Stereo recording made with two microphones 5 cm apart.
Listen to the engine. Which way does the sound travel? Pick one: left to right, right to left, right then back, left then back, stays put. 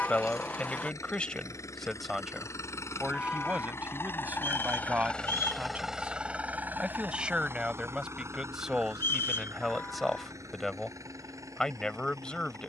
left to right.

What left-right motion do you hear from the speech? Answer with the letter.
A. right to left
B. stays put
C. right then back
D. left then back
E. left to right
C.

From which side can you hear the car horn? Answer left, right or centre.
left.